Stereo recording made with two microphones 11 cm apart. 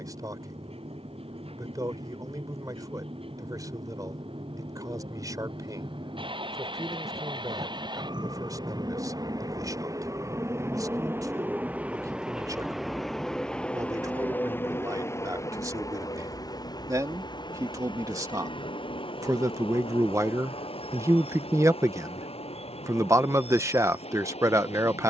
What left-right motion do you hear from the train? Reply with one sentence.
You can hear the train move from right to left.